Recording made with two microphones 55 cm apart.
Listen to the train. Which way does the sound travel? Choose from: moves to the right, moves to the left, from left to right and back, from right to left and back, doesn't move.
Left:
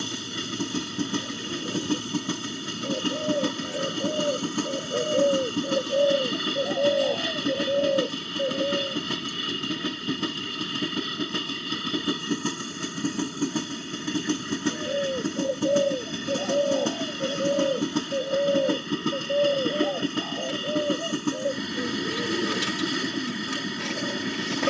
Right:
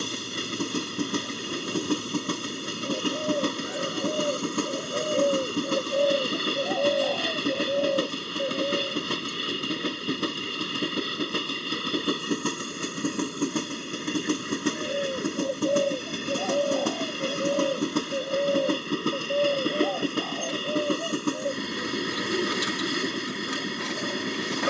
doesn't move.